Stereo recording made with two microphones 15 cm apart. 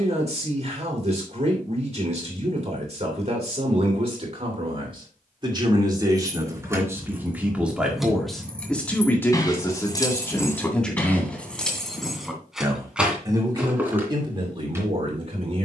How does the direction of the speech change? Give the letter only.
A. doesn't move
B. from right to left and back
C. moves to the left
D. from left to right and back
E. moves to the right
B.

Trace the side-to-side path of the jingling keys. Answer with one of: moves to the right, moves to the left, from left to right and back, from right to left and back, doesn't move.
from right to left and back.